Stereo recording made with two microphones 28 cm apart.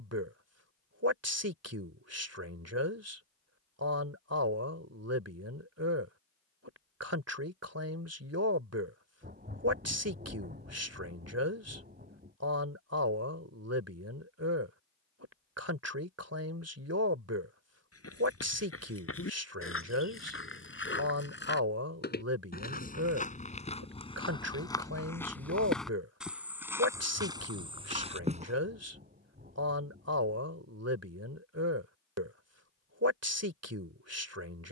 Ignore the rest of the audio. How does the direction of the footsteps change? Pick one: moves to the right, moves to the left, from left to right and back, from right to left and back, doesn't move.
moves to the right.